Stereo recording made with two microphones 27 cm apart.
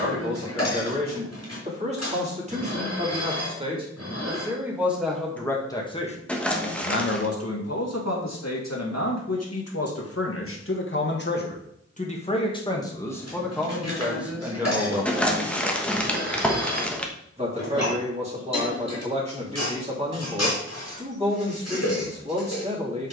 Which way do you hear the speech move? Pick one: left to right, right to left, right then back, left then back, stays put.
left then back.